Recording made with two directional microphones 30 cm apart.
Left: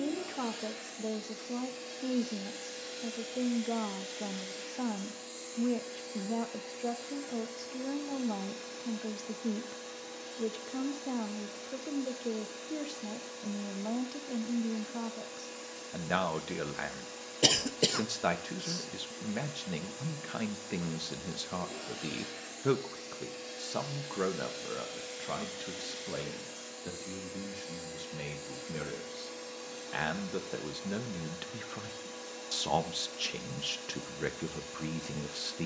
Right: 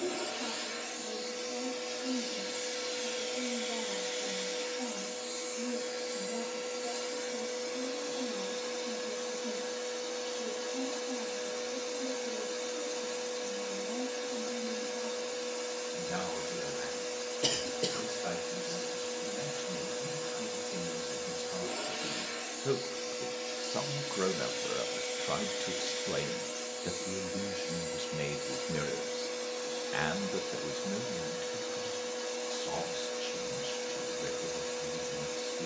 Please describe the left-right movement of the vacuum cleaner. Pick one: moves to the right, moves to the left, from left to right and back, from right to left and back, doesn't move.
doesn't move.